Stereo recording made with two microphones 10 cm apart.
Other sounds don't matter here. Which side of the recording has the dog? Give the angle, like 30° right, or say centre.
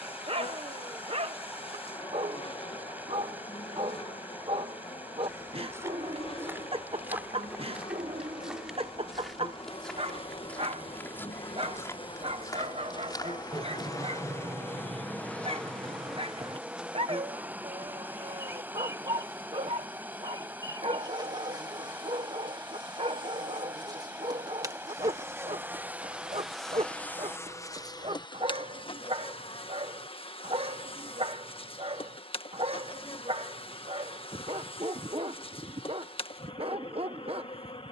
70° right.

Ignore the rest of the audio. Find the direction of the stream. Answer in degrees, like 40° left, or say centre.
20° right.